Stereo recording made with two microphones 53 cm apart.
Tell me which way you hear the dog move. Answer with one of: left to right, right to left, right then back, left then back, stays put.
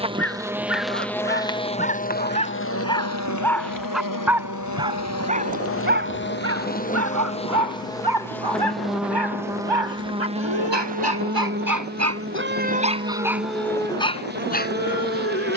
right then back.